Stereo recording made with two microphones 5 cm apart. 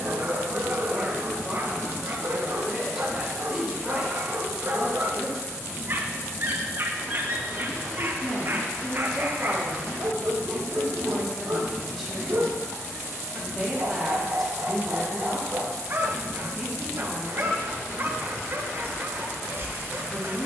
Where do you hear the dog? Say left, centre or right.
right.